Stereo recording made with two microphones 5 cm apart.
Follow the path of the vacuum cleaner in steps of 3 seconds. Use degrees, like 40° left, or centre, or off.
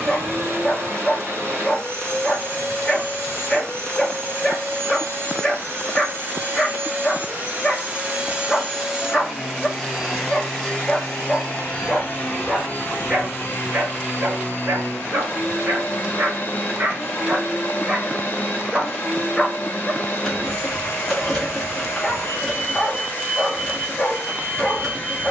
60° right, 60° right, 30° right, 10° left, 40° left, 40° left, 40° left, 40° left, 40° left.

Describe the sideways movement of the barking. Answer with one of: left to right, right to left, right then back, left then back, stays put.
right then back.